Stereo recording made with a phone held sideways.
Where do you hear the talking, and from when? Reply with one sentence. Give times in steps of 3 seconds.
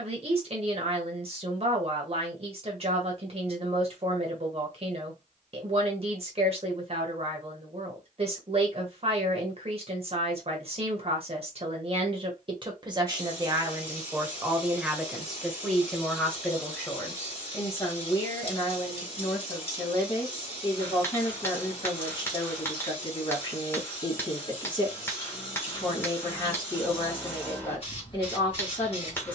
In this clip you hear the talking on the right from 0 s, in the centre from 15 s and on the left from 18 s.